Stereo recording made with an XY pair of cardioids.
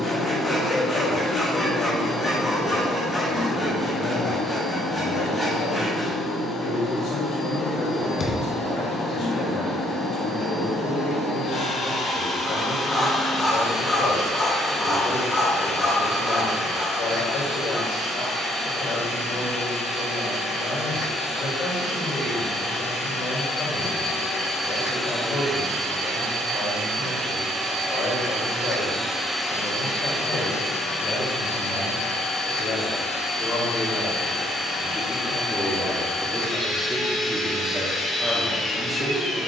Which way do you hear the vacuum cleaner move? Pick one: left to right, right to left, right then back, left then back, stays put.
right then back.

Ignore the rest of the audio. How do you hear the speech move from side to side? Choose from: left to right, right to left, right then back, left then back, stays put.
left to right.